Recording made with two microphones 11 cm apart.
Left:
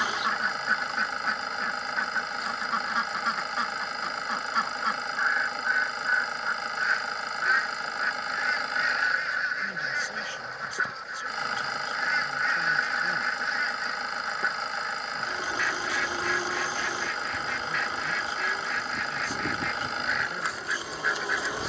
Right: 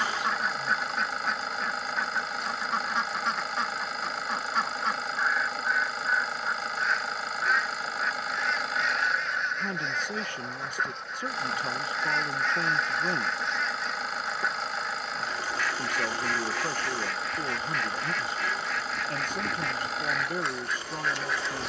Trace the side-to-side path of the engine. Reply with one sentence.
You can hear the engine stay put.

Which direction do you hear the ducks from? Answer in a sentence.
You can hear the ducks in the centre.